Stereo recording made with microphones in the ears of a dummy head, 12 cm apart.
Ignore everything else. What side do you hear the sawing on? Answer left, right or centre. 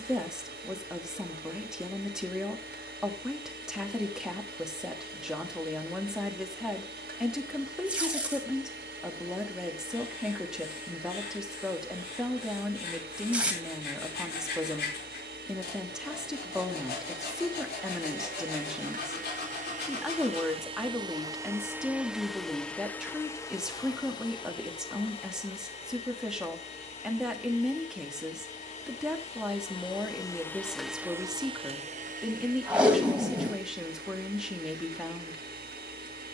left.